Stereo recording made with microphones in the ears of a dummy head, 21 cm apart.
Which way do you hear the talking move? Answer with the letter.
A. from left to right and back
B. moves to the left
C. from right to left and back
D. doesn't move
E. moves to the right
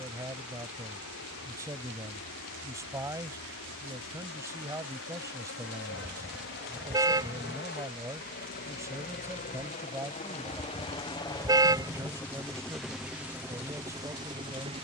D.